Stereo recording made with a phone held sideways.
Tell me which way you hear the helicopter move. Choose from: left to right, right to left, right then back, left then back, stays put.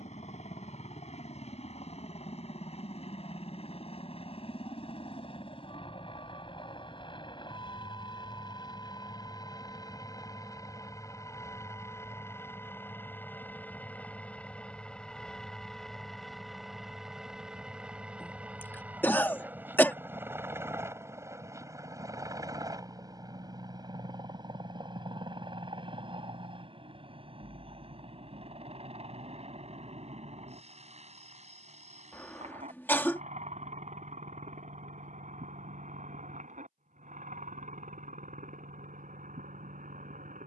left to right.